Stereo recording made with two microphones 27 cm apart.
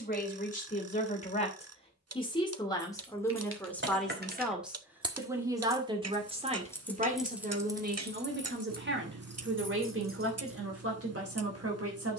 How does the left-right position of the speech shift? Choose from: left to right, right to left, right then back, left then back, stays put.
left to right.